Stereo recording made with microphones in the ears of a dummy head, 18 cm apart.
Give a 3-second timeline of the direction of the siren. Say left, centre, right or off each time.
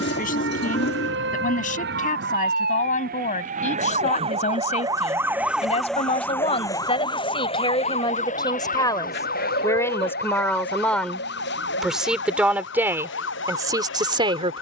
right, right, left, left, left.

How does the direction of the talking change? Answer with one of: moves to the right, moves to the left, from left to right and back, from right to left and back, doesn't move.
moves to the right.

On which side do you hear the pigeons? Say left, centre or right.
left.